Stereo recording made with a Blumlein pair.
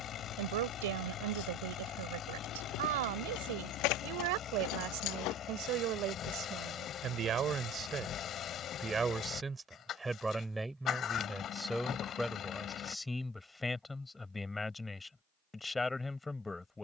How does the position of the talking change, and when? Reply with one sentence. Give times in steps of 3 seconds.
You can hear the talking on the right from 0 s and in the centre from 9 s.